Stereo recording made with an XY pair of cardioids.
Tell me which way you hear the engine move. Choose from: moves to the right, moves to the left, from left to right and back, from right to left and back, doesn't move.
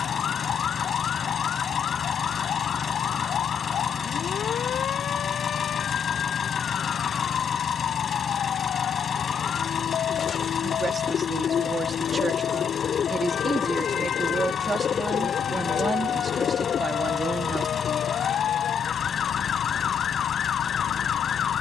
doesn't move.